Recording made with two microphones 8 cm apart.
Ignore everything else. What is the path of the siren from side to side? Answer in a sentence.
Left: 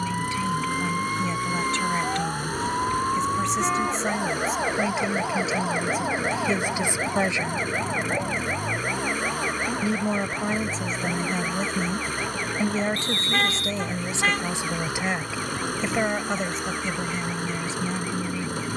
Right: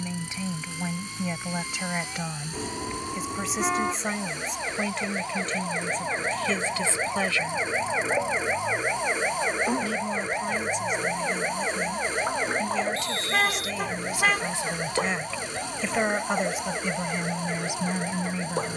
You can hear the siren move from left to right.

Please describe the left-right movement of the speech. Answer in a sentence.
You can hear the speech go left and come back.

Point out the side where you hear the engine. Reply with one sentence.
You can hear the engine on the left.